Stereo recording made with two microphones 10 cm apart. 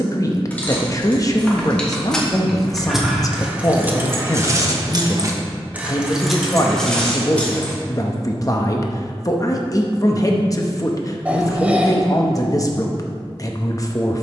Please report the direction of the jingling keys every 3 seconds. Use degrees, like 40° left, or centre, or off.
10° left, 20° right, 10° left, off, off.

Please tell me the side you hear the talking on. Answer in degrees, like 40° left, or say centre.
30° left.